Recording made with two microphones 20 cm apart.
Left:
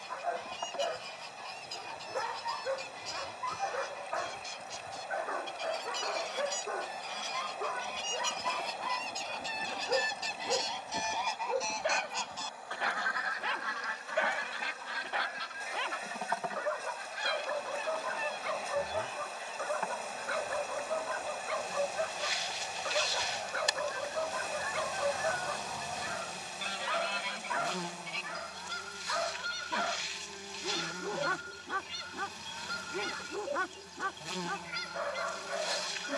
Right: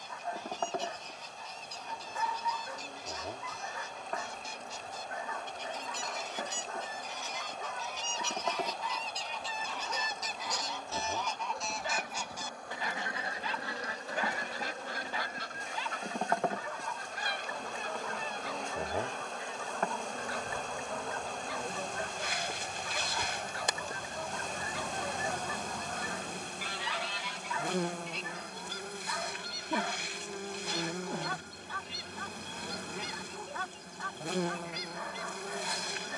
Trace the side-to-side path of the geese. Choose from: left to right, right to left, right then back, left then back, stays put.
right then back.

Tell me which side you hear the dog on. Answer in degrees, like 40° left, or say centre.
70° left.